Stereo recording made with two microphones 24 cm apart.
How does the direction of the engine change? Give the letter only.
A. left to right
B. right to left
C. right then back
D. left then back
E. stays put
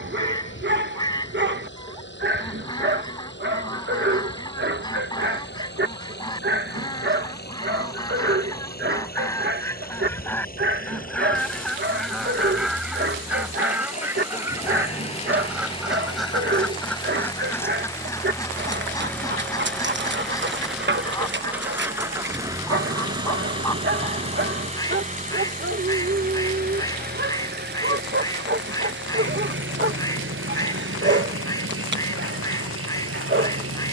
A.